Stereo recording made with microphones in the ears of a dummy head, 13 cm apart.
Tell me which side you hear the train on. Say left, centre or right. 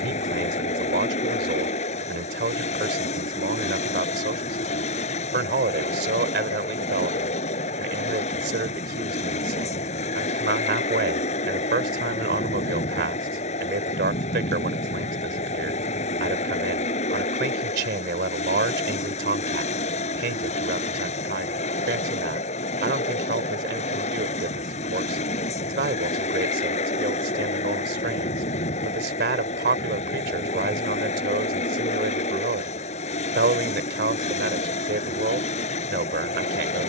left.